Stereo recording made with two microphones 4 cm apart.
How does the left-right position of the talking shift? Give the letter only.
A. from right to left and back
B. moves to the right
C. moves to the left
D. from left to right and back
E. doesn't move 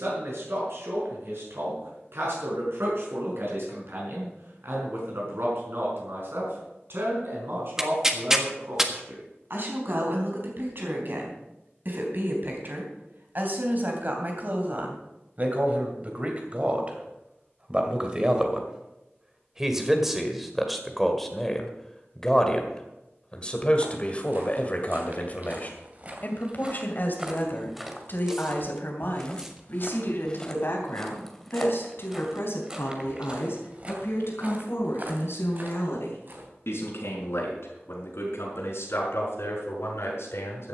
C.